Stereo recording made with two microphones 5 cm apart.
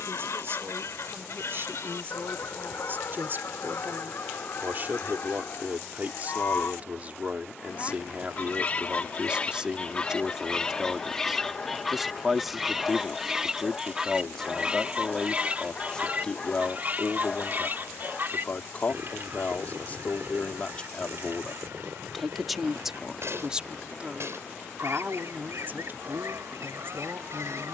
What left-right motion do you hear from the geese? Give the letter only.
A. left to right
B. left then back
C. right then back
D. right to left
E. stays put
A.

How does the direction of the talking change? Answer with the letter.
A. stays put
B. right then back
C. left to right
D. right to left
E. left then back
E.